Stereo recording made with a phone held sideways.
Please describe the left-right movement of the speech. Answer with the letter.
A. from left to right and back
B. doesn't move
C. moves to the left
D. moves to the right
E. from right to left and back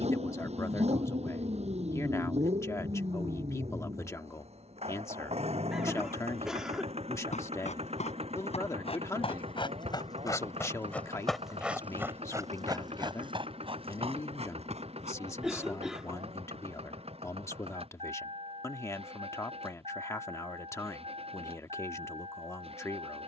B.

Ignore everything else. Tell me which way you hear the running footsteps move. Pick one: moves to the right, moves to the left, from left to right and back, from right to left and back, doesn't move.
moves to the right.